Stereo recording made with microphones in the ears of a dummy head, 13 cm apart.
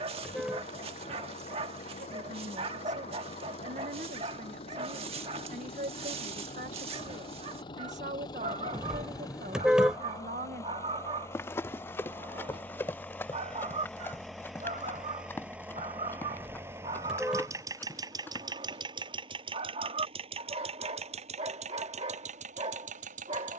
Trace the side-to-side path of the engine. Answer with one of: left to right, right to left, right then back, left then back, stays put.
left to right.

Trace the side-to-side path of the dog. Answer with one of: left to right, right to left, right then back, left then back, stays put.
stays put.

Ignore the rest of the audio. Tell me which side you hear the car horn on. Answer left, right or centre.
centre.